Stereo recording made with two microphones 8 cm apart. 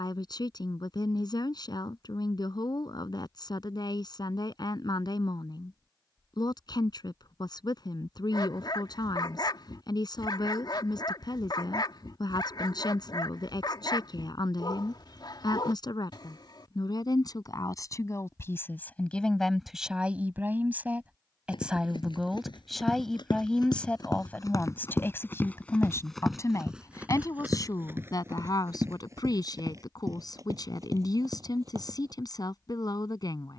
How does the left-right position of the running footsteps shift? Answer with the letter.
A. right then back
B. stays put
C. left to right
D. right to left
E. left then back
C.